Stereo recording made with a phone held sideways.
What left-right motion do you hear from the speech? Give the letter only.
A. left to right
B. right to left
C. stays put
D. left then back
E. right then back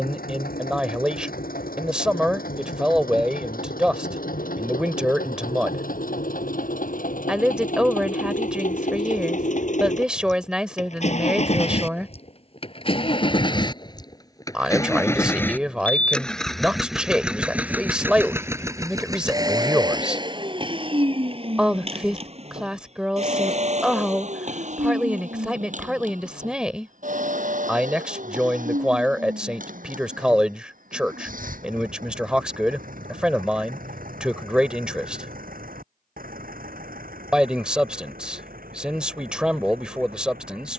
C.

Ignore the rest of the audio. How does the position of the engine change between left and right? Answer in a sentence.
You can hear the engine go from the left side to the right.